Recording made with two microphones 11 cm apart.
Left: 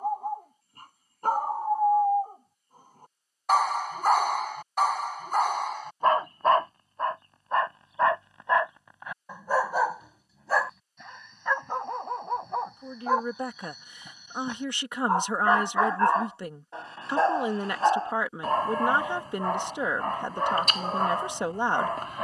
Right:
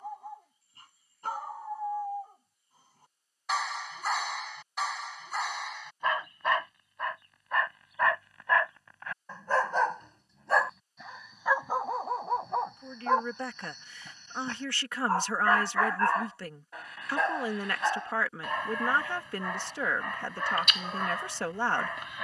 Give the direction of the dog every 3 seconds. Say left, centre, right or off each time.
left, left, left, centre, centre, left, left, left.